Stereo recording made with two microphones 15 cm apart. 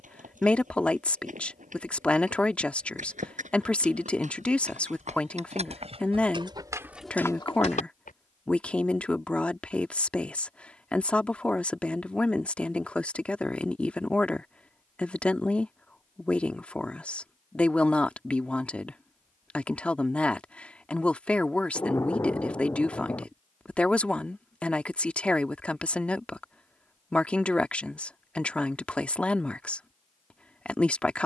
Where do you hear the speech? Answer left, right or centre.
centre.